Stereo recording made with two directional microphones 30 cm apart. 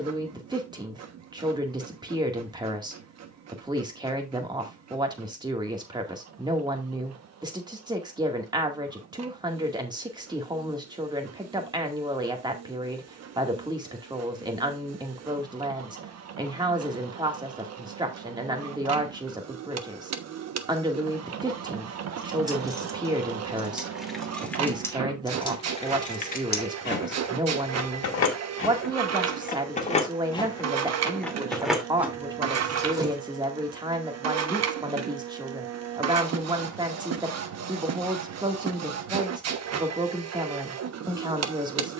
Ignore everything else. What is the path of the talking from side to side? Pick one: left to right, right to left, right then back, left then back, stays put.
stays put.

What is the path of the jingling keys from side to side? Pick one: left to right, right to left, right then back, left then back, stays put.
left then back.